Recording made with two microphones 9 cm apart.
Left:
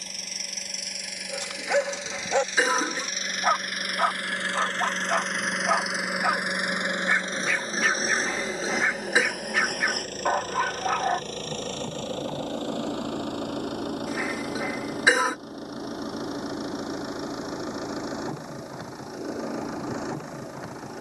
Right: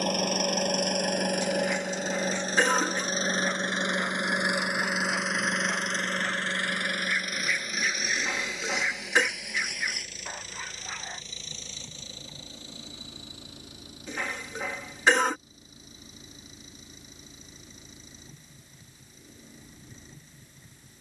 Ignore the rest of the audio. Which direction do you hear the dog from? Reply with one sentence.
You can hear the dog on the left.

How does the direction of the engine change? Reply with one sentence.
You can hear the engine move to the left.